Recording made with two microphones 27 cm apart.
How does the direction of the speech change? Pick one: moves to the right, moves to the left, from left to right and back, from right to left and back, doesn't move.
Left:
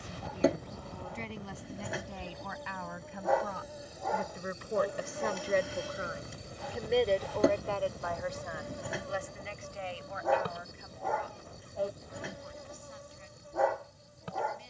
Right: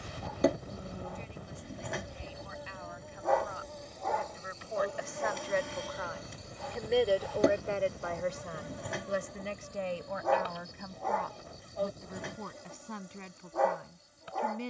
moves to the right.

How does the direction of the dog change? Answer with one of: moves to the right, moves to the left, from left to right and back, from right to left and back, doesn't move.
doesn't move.